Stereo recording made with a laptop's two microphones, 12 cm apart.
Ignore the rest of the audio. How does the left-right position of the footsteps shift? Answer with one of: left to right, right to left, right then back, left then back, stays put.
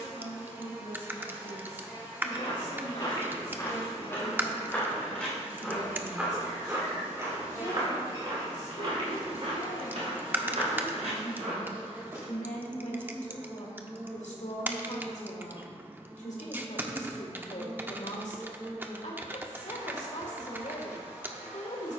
left to right.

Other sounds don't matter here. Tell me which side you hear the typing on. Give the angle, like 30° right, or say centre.
20° right.